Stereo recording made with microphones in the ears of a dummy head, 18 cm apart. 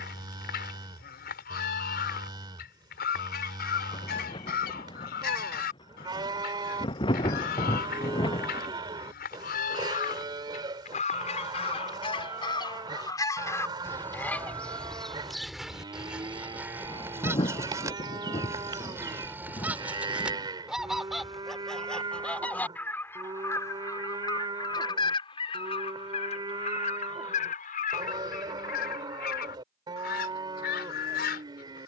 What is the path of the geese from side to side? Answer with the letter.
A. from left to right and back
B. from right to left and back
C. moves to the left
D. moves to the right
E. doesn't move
A.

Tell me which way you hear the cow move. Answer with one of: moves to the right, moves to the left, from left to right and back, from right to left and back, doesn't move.
doesn't move.